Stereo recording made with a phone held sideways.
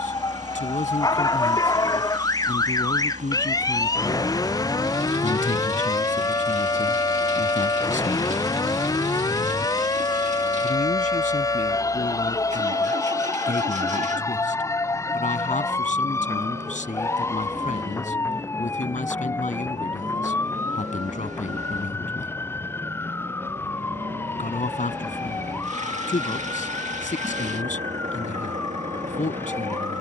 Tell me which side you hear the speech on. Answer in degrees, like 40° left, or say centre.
50° left.